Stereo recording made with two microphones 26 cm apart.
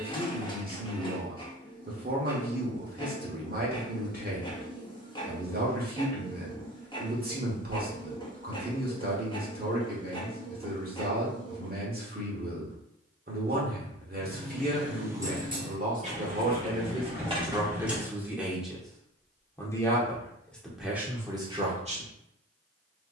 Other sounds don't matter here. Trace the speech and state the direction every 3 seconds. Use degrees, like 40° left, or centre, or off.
40° right, 40° right, 40° right, 40° right, 40° right, 30° right, centre, 20° right.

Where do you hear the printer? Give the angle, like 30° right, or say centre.
20° left.